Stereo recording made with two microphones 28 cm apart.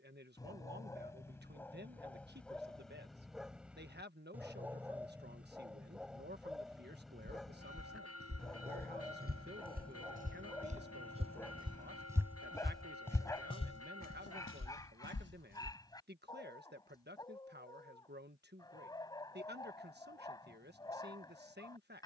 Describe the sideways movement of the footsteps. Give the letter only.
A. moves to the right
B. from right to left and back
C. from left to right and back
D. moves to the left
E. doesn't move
D.